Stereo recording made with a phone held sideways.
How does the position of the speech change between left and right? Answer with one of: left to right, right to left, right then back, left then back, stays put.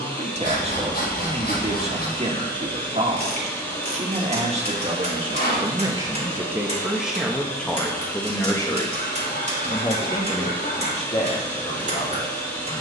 right to left.